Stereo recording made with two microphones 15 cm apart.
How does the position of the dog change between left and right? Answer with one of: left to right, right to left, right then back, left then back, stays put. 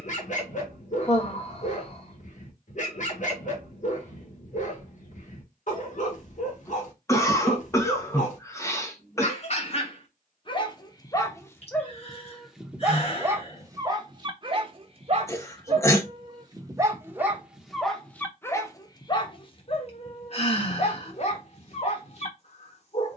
right then back.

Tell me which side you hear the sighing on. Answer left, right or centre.
left.